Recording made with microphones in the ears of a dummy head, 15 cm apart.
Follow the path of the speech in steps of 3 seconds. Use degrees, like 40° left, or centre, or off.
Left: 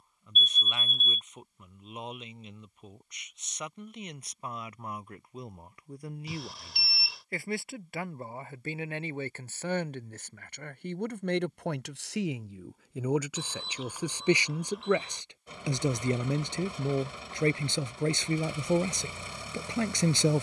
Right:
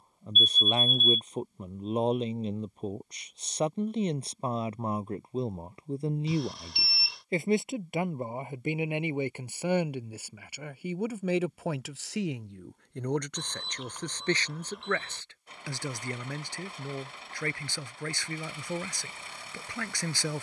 30° right, 30° right, 20° right, 10° right, 10° left, 20° left, 20° left.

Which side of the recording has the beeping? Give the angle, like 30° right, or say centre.
centre.